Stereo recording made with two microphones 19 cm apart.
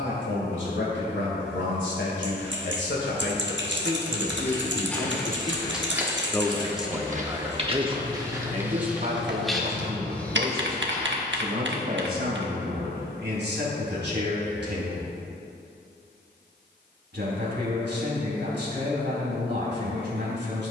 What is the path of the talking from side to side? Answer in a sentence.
In this clip you hear the talking move from left to right.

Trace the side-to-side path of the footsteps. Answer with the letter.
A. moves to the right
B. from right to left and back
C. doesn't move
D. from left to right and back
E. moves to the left
D.